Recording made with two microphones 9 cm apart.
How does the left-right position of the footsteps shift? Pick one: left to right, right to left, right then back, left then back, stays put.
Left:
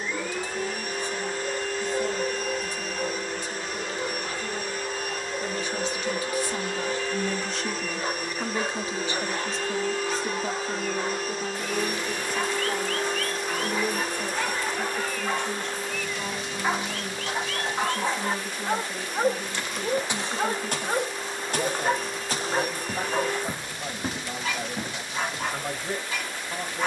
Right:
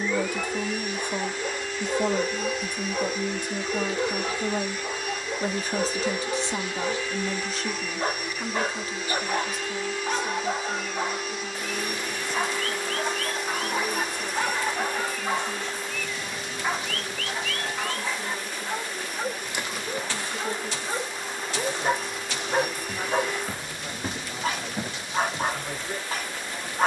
left then back.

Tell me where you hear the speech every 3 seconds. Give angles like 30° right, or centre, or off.
50° right, 50° right, 10° right, 30° left, 50° left, 50° left, 60° left, 60° left, 60° left.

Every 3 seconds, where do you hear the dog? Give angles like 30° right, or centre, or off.
40° right, 40° right, 40° right, 40° right, 30° right, 10° left, 40° left, 10° right, 40° right.